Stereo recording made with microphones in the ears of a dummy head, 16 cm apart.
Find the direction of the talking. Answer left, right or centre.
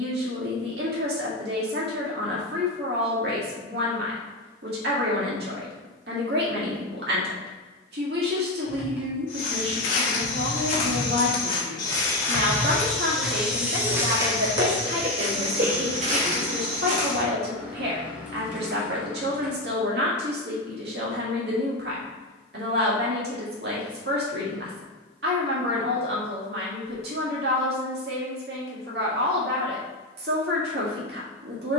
right.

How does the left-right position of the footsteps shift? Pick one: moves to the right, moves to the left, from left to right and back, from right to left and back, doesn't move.
moves to the right.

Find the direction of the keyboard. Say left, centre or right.
centre.